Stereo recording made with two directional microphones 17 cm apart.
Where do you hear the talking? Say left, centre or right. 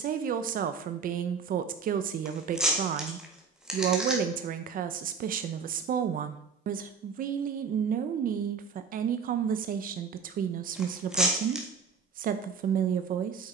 right.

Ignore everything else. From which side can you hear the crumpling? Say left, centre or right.
centre.